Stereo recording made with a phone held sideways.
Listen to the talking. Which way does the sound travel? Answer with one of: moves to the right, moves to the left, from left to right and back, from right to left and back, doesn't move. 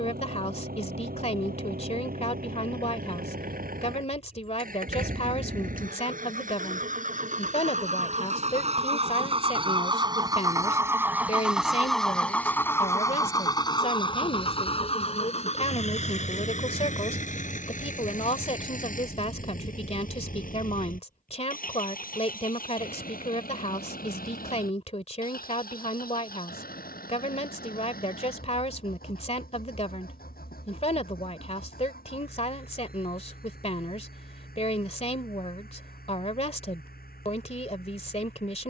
doesn't move.